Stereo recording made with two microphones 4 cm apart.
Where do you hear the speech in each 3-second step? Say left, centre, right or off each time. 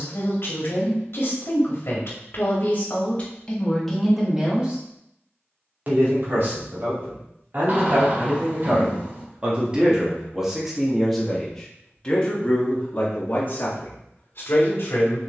left, centre, right, centre, left.